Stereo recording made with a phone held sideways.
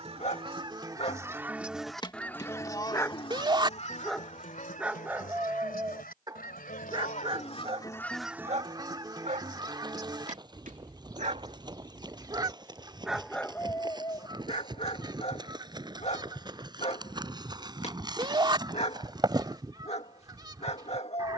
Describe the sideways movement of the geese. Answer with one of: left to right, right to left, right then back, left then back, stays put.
left then back.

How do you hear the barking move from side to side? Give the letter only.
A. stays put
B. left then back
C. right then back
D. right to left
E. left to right
C.